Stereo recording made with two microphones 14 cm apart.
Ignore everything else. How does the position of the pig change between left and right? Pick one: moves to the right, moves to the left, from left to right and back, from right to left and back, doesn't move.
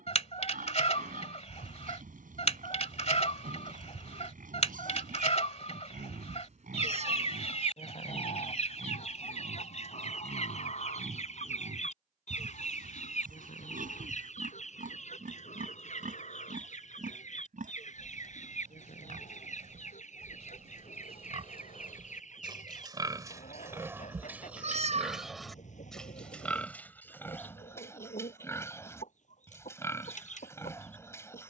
moves to the left.